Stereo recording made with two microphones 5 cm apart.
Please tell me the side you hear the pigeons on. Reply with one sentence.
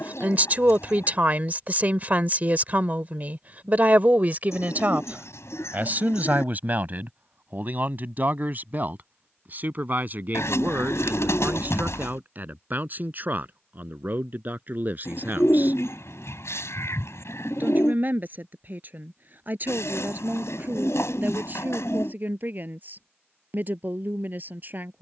In this clip you hear the pigeons on the left.